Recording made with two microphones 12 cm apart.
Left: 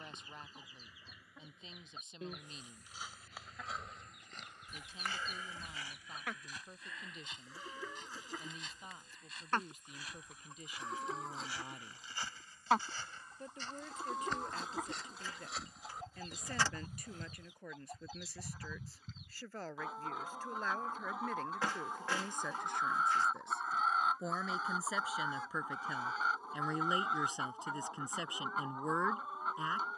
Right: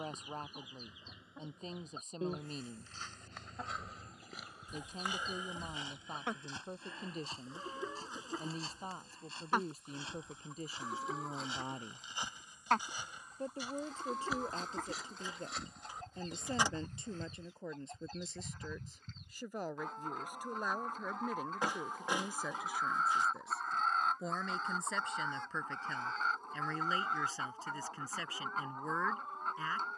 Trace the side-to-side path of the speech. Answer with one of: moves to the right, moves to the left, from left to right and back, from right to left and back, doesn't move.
moves to the left.